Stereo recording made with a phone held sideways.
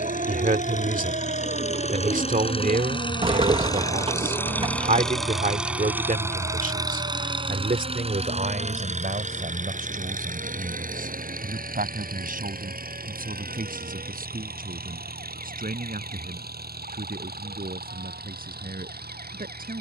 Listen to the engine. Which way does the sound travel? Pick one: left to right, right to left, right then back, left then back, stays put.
left to right.